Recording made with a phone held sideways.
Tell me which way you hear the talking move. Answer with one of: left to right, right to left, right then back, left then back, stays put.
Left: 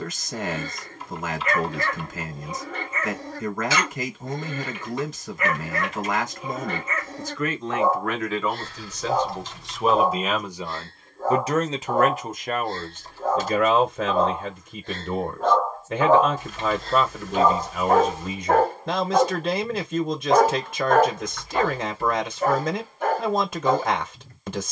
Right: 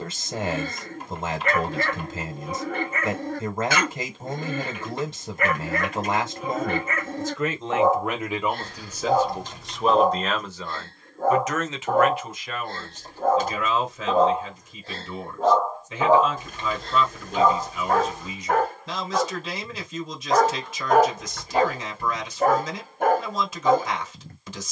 right to left.